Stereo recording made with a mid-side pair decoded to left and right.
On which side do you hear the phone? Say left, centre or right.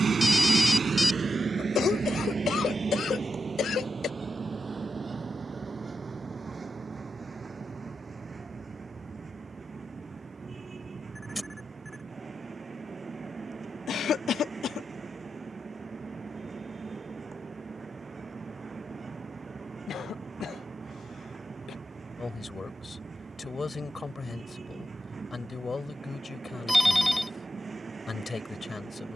centre.